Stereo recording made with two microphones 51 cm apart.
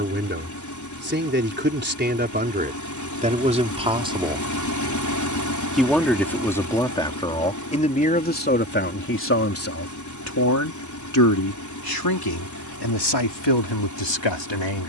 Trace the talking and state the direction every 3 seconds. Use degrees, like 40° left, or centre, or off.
20° right, 10° right, 10° left, 30° left, 50° left.